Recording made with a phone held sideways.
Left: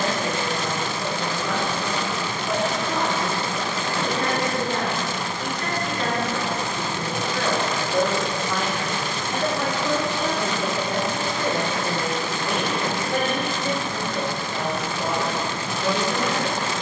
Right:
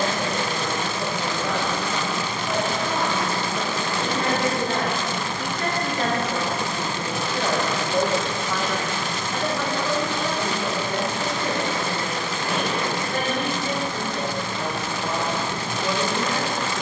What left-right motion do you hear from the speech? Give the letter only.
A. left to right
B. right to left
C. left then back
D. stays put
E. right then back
B.